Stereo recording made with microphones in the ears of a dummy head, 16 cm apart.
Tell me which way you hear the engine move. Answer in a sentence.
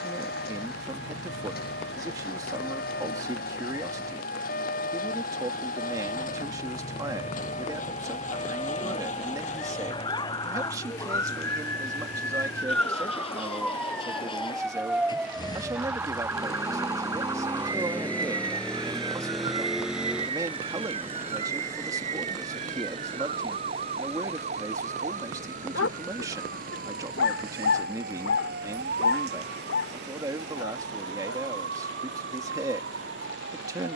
In this clip you hear the engine go from the left side to the right.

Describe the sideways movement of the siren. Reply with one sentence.
You can hear the siren travel towards the right.